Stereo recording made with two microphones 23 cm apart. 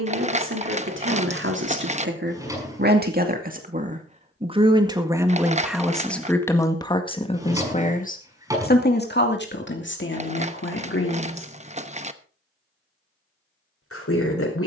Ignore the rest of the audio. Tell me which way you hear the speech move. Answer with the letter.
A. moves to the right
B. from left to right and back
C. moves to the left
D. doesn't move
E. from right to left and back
C.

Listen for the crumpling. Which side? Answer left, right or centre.
right.